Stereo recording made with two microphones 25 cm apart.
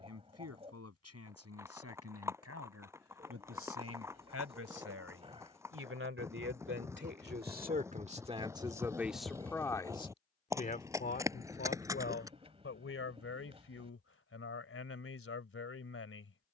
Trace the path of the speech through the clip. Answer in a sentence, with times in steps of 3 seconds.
You can hear the speech on the right from 0 s and on the left from 9 s.